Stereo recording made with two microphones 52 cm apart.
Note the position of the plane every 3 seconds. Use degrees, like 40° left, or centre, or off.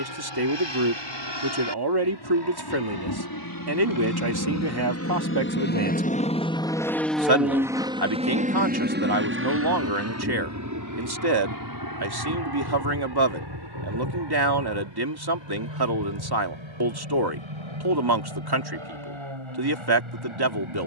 60° left, 30° left, centre, 30° right, 40° right, 50° right, 60° right.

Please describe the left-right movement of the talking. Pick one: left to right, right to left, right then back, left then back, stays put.
stays put.